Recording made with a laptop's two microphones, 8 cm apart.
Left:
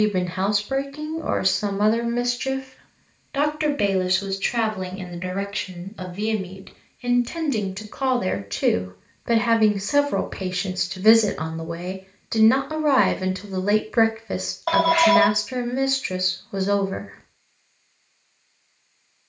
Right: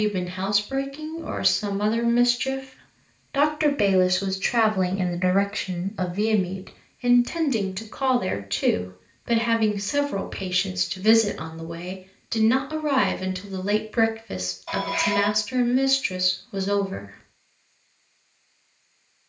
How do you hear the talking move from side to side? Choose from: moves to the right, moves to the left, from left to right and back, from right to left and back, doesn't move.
from left to right and back.